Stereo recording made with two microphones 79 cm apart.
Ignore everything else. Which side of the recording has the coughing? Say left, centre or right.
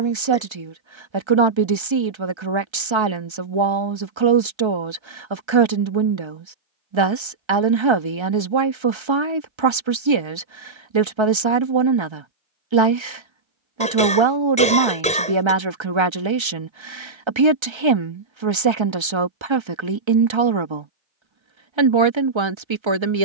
centre.